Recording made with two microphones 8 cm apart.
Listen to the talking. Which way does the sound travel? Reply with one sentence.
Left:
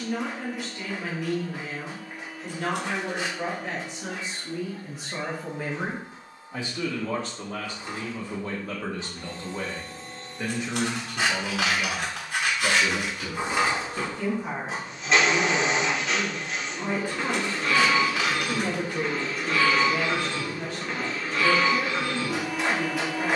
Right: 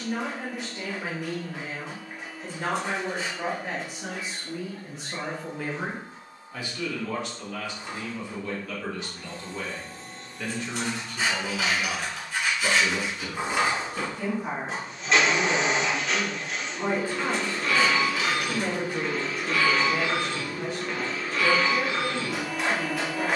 You can hear the talking go left and come back.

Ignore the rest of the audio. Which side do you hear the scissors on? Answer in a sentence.
You can hear the scissors on the left.